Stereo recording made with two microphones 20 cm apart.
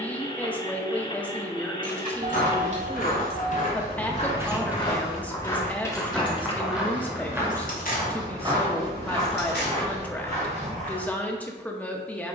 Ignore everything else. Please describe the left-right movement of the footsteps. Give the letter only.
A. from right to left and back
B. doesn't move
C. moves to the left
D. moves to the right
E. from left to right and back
D.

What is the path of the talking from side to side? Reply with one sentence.
You can hear the talking stay in one place.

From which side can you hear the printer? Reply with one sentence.
You can hear the printer on the left.